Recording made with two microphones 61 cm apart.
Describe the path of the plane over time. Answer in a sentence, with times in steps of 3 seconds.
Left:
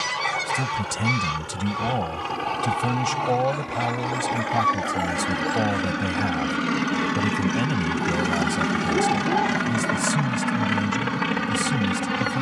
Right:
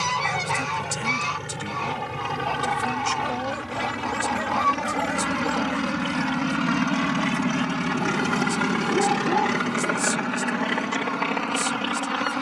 In this clip you hear the plane on the right from 0 s, in the centre from 6 s and on the left from 9 s.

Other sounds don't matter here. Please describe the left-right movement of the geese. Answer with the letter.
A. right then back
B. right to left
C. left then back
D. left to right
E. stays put
E.